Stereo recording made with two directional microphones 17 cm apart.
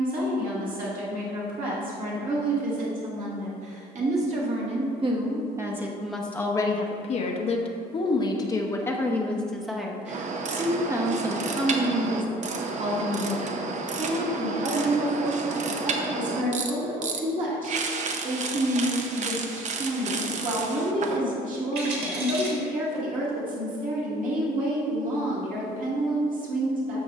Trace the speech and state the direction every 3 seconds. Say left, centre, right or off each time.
right, right, left, centre, right, right, right, right, right.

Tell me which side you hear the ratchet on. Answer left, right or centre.
right.